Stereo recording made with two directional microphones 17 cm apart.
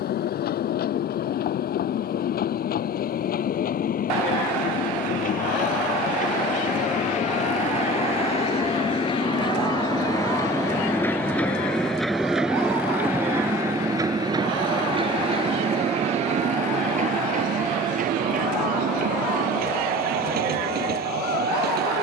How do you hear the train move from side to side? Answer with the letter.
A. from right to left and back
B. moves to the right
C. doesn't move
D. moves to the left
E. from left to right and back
B.